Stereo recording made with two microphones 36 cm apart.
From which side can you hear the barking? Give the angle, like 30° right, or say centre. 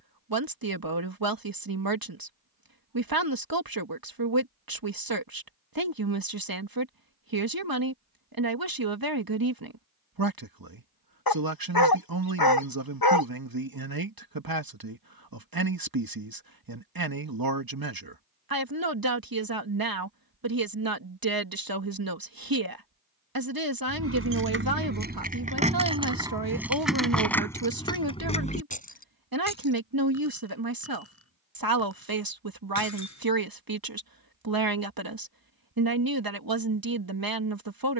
70° left.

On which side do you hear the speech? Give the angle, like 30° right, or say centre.
70° right.